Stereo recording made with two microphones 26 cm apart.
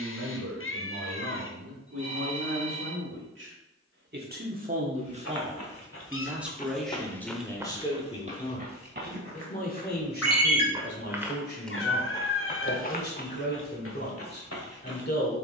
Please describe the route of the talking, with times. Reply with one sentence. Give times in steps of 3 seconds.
You can hear the talking on the right from 0 s, in the centre from 6 s and on the left from 9 s.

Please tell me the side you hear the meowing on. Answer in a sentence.
In this clip you hear the meowing on the left.